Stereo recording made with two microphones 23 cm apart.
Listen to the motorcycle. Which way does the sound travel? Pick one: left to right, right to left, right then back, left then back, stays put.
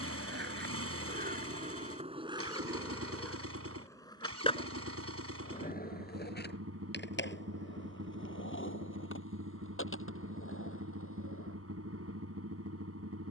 stays put.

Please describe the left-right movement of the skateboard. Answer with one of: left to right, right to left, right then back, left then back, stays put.
right to left.